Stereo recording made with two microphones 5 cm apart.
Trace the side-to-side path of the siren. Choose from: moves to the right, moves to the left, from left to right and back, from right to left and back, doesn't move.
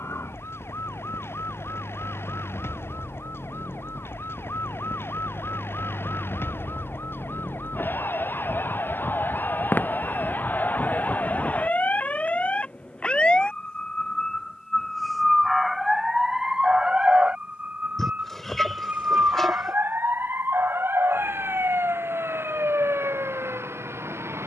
moves to the right.